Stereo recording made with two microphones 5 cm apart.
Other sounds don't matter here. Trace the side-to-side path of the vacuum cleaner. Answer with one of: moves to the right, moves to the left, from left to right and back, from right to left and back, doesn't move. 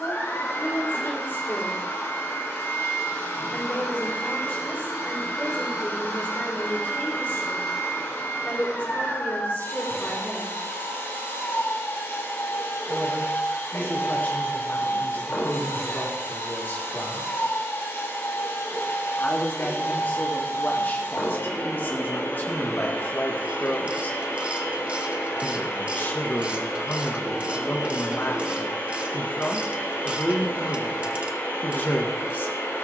doesn't move.